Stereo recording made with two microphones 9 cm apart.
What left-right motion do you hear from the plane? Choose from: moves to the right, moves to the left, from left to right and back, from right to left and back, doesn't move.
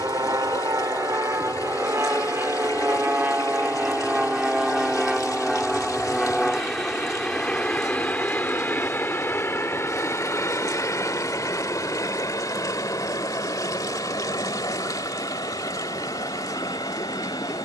moves to the left.